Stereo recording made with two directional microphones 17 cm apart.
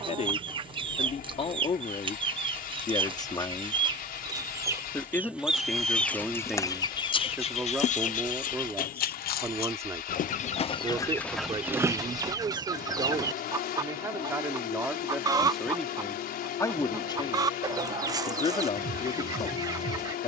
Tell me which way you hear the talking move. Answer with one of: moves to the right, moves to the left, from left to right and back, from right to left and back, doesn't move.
from left to right and back.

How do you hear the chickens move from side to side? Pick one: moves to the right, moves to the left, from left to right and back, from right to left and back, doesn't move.
from right to left and back.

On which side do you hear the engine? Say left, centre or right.
left.